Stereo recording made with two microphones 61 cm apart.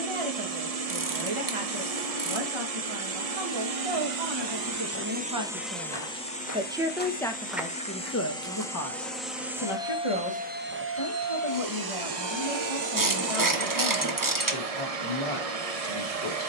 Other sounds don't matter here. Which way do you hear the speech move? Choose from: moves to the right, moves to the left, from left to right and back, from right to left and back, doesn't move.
moves to the left.